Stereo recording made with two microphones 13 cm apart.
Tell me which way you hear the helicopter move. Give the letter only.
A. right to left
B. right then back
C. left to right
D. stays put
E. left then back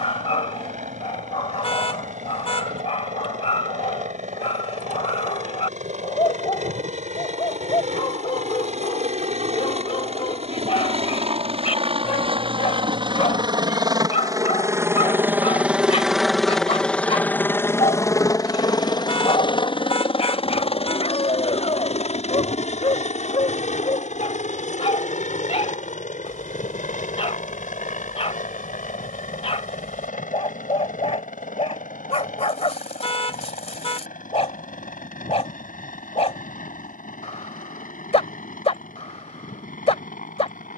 A.